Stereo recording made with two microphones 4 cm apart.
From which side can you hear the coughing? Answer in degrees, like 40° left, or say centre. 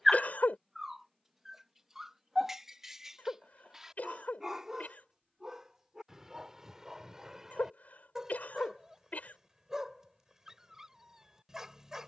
40° left.